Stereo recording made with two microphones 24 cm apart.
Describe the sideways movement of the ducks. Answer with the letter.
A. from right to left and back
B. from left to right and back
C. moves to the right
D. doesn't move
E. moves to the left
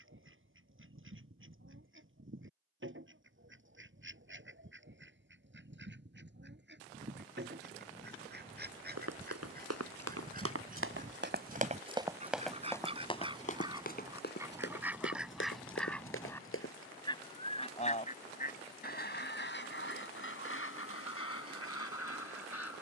E.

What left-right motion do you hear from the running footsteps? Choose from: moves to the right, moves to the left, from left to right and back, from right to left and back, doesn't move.
moves to the left.